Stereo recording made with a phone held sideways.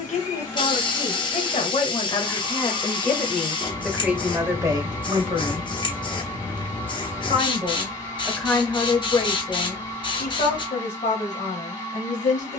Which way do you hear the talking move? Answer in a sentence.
You can hear the talking go right and come back.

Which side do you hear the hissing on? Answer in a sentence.
You can hear the hissing on the left.